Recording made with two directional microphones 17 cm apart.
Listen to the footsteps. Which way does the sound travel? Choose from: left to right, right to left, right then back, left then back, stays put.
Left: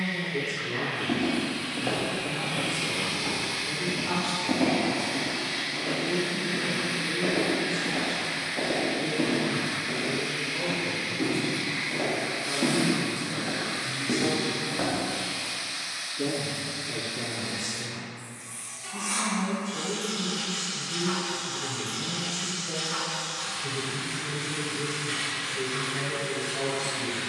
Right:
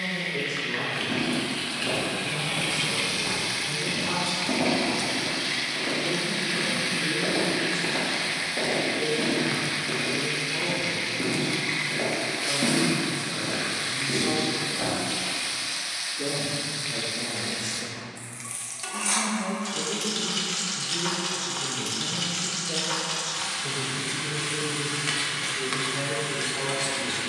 right then back.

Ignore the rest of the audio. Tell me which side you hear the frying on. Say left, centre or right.
right.